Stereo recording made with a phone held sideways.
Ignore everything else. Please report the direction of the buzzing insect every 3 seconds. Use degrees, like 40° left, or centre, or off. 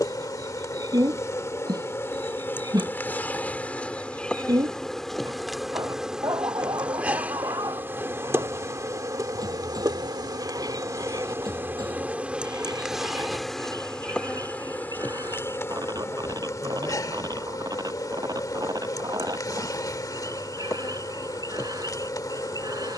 20° left, centre, 10° right, 20° right, centre, 20° left, 20° left, 20° left.